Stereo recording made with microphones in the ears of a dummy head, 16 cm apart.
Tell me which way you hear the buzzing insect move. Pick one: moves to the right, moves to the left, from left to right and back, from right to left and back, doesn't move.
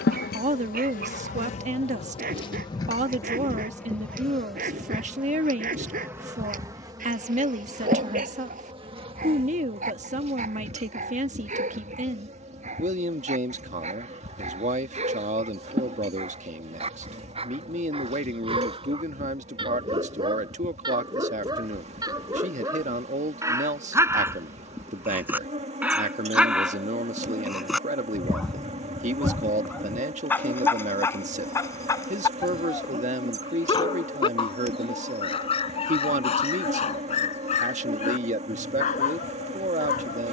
moves to the right.